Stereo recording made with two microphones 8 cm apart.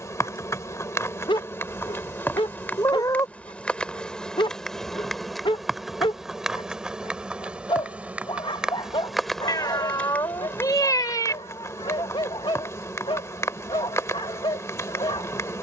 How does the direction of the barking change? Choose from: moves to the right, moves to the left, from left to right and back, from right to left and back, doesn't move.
doesn't move.